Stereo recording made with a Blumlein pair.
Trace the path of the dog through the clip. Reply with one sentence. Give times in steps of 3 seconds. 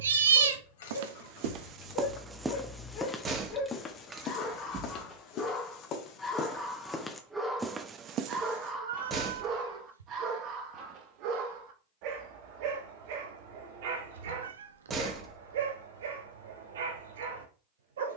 You can hear the dog on the left from 0 s, in the centre from 6 s and on the right from 9 s.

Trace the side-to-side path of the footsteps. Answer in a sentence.
You can hear the footsteps move from right to left and back again.